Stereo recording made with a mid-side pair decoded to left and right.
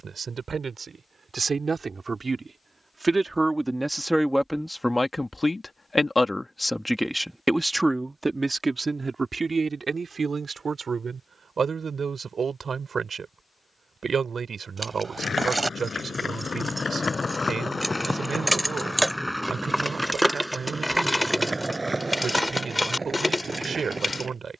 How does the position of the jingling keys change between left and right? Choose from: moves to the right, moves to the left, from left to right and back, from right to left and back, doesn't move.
moves to the left.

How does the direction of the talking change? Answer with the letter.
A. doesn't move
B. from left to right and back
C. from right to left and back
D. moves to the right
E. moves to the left
C.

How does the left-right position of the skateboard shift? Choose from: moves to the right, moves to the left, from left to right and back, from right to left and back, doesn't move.
moves to the right.